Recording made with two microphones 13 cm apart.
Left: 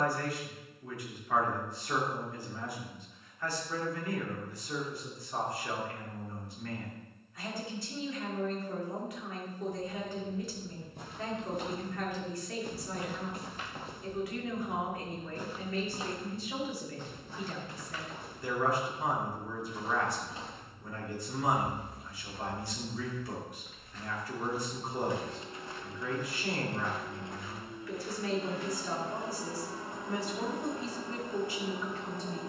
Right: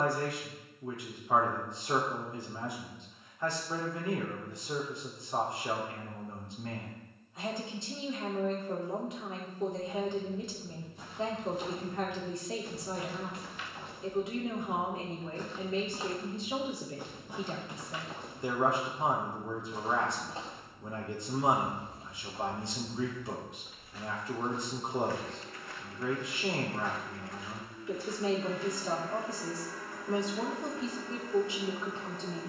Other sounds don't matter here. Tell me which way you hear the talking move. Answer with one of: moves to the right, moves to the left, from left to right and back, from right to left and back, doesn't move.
doesn't move.